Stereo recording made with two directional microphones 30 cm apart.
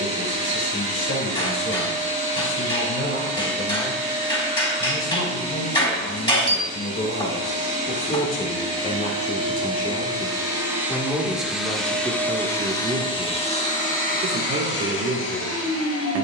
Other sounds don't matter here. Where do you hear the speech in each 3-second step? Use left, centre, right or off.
left, left, left, centre, right, right.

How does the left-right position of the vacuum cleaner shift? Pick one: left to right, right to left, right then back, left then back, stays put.
right to left.